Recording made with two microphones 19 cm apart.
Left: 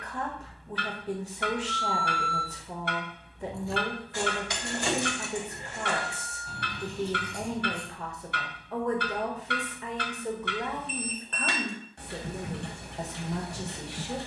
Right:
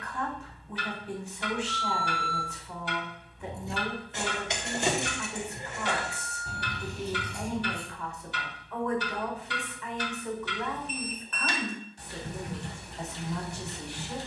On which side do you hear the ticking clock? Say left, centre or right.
left.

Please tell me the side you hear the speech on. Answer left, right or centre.
left.